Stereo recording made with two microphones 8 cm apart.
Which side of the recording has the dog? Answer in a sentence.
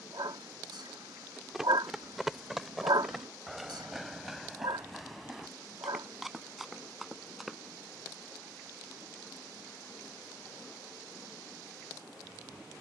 You can hear the dog on the right.